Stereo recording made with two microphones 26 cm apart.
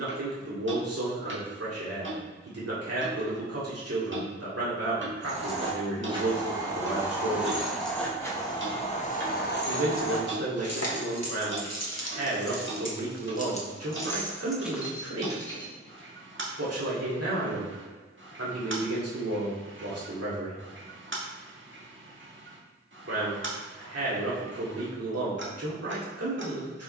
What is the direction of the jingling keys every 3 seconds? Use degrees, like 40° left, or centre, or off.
off, 20° right, centre, 60° left, 30° left, 20° right, off, off, off.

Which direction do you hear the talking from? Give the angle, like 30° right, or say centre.
60° right.